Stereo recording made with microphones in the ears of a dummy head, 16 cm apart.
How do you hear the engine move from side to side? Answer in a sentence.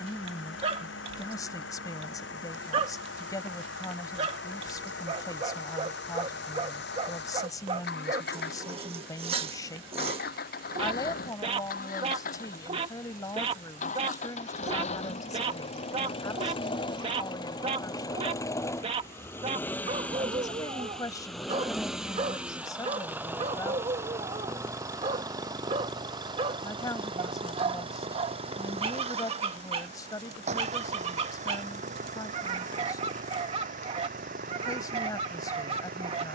In this clip you hear the engine go from the left side to the right.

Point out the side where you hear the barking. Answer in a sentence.
In this clip you hear the barking on the right.